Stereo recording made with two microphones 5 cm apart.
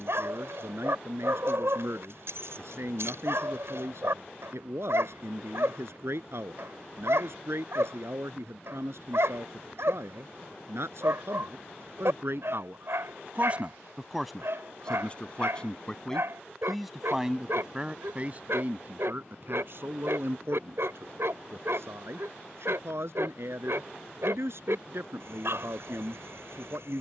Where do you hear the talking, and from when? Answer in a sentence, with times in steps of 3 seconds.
You can hear the talking on the right from 0 s, in the centre from 15 s and on the right from 18 s.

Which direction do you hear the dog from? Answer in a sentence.
In this clip you hear the dog on the right.